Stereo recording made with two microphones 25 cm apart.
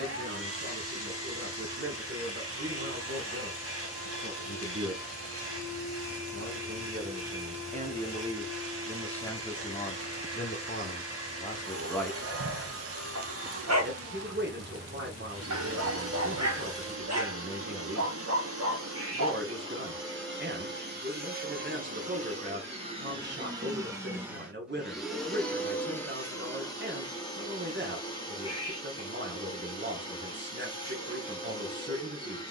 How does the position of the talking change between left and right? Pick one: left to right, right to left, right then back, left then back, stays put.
left then back.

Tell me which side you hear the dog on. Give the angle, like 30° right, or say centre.
80° right.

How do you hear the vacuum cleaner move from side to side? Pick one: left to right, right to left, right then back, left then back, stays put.
right to left.